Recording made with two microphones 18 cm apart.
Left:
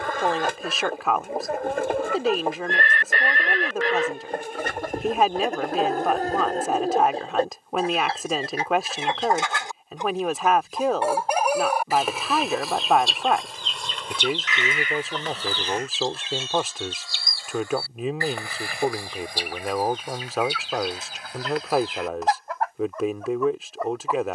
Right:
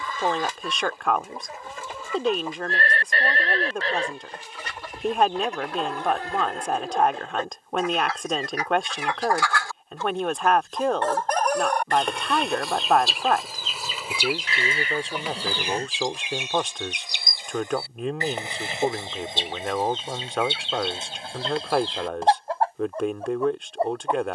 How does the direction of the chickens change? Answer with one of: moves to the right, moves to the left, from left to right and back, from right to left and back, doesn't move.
moves to the right.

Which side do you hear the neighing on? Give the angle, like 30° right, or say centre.
40° right.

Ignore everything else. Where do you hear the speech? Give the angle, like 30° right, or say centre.
centre.